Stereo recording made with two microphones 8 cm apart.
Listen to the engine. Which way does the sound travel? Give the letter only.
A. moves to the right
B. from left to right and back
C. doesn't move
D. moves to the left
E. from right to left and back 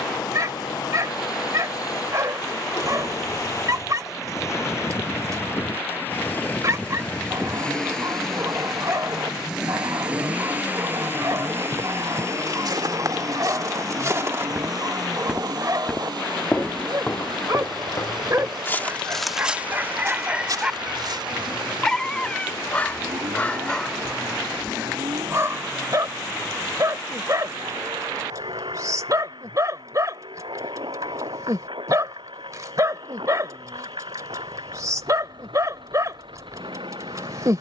A.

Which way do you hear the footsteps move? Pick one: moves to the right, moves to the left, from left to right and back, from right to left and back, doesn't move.
from right to left and back.